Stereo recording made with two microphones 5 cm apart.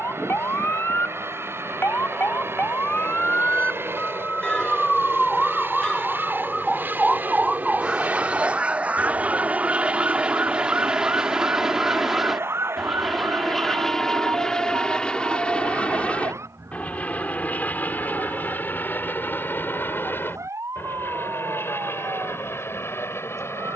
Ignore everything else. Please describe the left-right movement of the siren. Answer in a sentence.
You can hear the siren move from left to right.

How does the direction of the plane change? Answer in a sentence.
In this clip you hear the plane move from right to left.